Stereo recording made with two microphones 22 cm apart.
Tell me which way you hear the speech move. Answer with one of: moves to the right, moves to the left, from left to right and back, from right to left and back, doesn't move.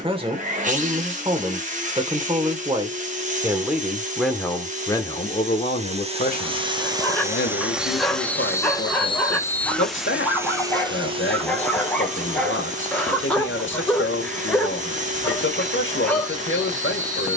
moves to the left.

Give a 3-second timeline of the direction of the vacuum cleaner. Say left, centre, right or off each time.
right, right, centre, centre, right, right.